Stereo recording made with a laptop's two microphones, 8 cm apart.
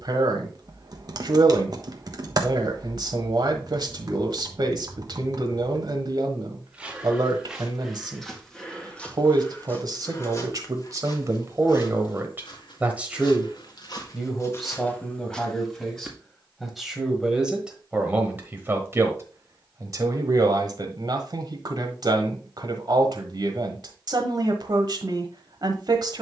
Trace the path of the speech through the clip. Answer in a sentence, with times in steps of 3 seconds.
You can hear the speech on the right from 0 s, in the centre from 12 s and on the right from 18 s.